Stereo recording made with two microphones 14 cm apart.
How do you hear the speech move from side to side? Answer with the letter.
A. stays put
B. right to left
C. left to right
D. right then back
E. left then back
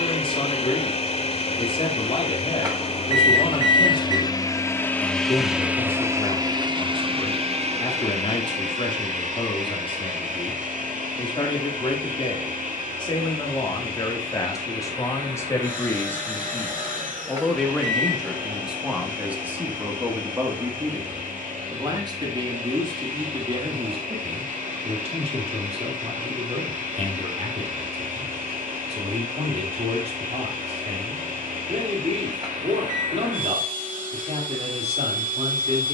C.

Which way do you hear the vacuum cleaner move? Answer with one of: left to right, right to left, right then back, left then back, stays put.
left to right.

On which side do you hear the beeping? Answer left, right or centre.
right.